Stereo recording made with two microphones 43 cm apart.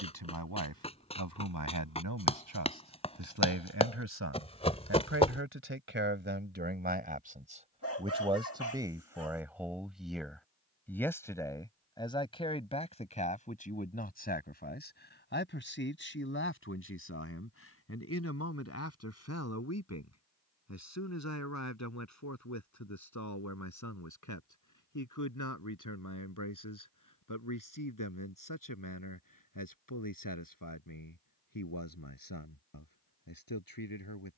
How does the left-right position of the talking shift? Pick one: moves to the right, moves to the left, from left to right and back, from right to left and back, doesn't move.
moves to the left.